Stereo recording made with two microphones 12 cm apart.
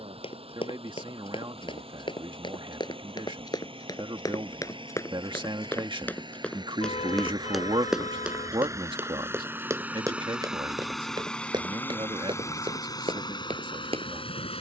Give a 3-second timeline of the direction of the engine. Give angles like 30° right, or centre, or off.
50° right, 50° right, 30° right, centre, 40° left.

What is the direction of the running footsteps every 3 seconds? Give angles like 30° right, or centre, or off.
50° left, 30° left, centre, 30° right, 50° right.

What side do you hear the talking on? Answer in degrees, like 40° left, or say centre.
50° right.